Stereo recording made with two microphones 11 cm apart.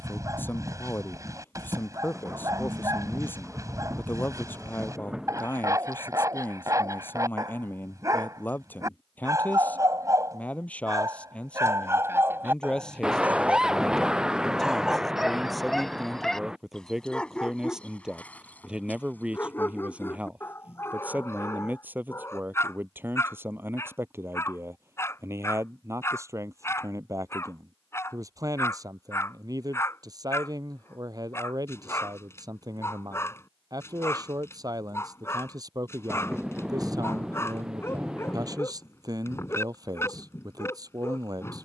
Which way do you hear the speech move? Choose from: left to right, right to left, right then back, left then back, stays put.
left to right.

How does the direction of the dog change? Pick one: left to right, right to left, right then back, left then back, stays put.
right to left.